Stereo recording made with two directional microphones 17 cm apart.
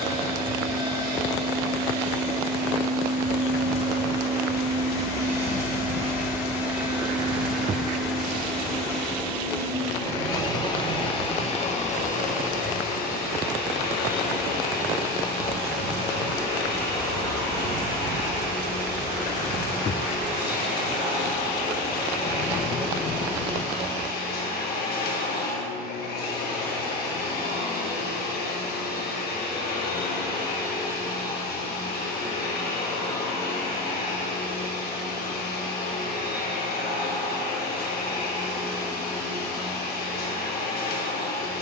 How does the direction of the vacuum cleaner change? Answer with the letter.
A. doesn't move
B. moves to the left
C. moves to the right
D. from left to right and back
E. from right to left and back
B.